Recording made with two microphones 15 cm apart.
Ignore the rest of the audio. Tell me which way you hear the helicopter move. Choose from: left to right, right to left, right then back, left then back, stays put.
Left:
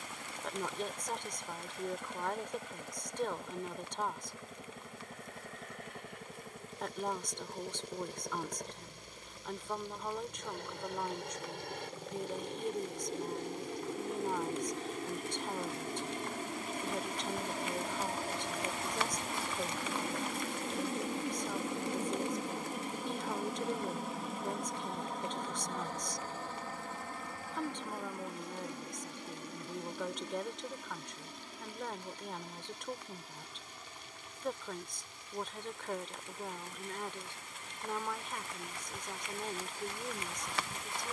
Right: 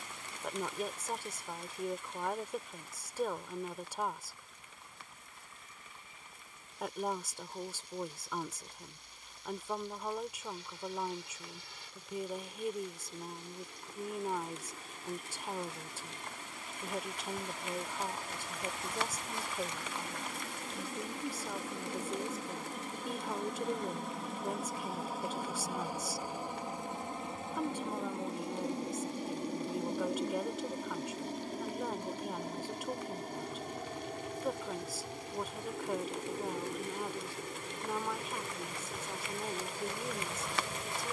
left to right.